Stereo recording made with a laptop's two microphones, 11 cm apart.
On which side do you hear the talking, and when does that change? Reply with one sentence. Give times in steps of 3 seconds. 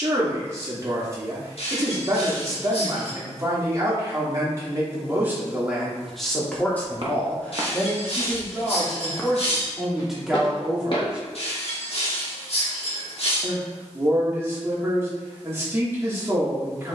You can hear the talking on the right from 0 s, in the centre from 6 s and on the right from 12 s.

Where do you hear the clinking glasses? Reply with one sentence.
You can hear the clinking glasses on the left.